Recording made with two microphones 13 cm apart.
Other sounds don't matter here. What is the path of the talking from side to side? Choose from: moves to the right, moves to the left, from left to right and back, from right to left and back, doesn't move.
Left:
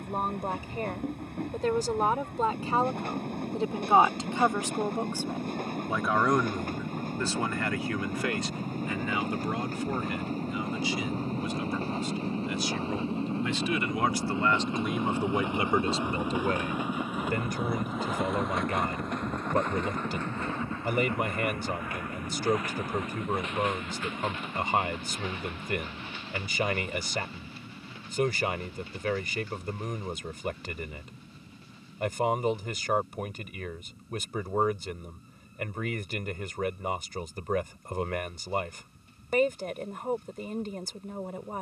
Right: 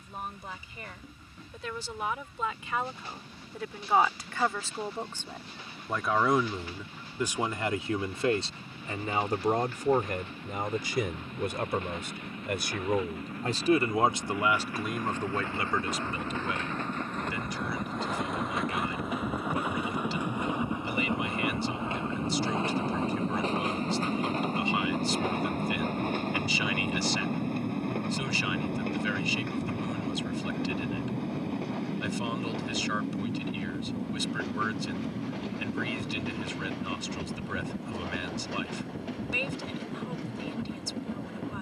from left to right and back.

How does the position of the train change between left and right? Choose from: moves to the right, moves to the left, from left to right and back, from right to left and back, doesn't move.
moves to the right.